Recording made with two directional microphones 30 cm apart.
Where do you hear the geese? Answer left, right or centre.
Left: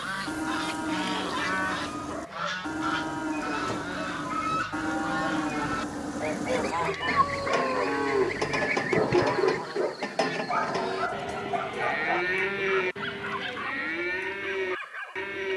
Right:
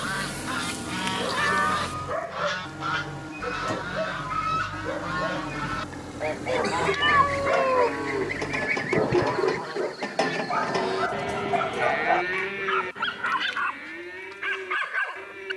centre.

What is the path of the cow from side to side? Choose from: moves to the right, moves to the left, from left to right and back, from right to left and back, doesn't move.
from left to right and back.